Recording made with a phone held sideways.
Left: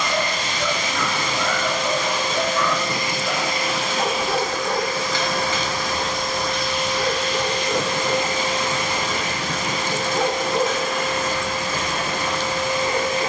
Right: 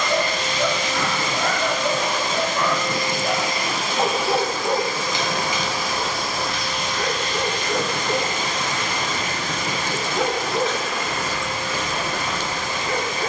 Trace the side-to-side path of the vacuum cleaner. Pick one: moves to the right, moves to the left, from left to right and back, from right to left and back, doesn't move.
moves to the left.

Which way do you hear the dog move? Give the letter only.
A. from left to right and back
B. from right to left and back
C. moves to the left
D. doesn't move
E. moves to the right
C.